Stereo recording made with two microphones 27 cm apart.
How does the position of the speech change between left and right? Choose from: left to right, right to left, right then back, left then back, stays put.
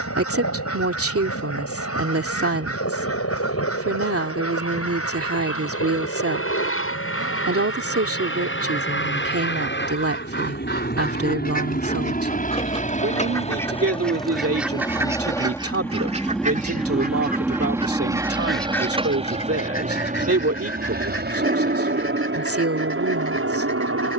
stays put.